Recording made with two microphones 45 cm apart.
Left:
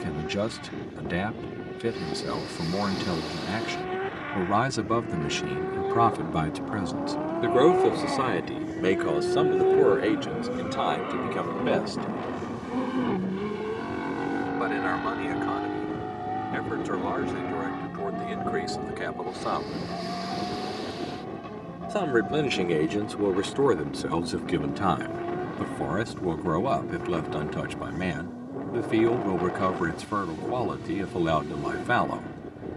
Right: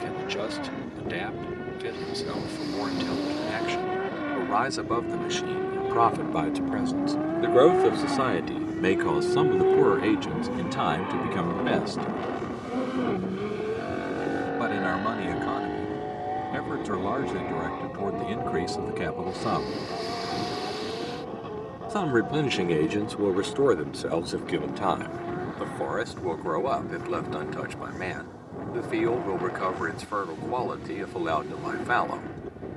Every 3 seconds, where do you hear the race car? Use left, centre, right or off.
right, right, right, centre, centre, left, left, left, left, left, left.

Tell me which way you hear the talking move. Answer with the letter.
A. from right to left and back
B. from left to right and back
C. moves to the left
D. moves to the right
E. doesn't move
B.